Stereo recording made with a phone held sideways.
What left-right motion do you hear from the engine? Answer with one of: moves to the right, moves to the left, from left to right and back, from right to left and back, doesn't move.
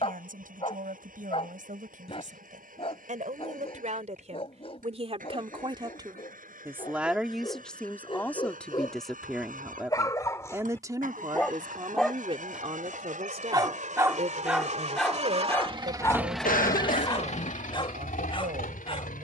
moves to the left.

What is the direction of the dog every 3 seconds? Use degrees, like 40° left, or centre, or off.
40° left, 40° left, 40° left, 20° left, 10° right, 20° left, 40° left.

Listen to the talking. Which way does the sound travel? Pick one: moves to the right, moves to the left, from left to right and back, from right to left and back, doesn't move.
from right to left and back.